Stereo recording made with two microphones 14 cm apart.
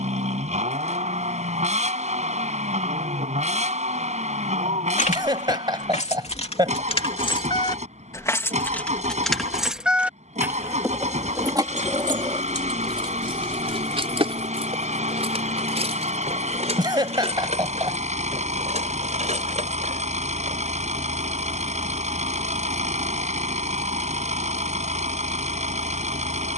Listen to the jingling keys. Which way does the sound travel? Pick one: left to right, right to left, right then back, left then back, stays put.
left to right.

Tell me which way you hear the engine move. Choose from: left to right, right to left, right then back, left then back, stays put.
stays put.